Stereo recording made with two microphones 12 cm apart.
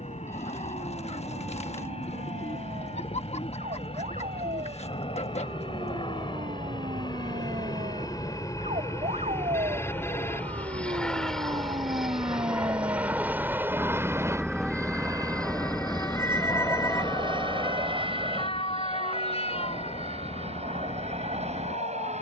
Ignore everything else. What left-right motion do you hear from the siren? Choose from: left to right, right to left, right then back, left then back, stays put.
right to left.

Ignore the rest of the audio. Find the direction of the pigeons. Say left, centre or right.
left.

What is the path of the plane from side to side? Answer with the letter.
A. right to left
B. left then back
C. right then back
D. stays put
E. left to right
E.